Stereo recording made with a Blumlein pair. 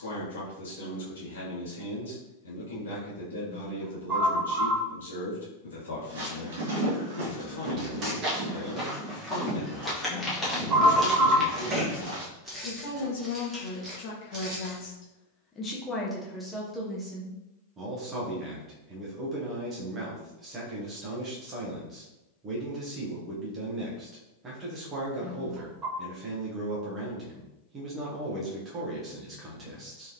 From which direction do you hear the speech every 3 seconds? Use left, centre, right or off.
left, left, left, left, left, centre, right, right, right, right.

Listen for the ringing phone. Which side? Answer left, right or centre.
right.